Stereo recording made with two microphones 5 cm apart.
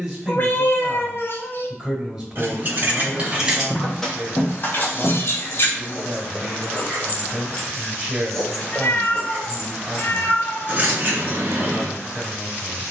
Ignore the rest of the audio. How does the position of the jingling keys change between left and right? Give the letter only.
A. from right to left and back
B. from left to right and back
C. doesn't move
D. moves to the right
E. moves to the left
A.